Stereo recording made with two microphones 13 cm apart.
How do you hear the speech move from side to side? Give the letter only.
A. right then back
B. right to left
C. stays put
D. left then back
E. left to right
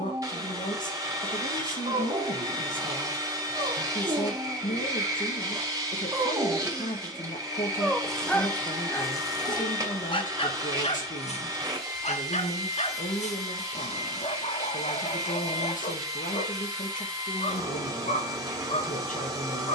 C.